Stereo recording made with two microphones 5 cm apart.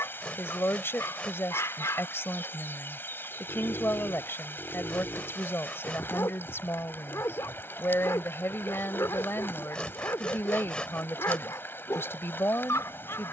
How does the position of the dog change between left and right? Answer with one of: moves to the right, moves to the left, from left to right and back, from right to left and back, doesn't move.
doesn't move.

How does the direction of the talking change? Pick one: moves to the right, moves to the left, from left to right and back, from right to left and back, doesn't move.
doesn't move.